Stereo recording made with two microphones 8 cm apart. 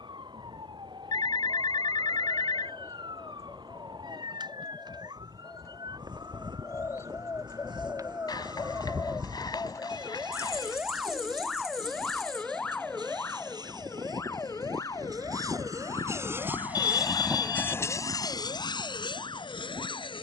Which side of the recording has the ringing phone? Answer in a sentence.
You can hear the ringing phone on the left.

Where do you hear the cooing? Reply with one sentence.
In this clip you hear the cooing on the left.